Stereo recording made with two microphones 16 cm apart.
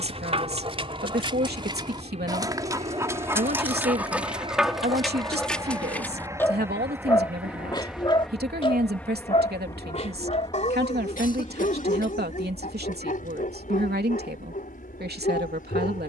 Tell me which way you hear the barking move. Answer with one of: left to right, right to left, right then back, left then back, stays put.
right to left.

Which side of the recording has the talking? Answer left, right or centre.
right.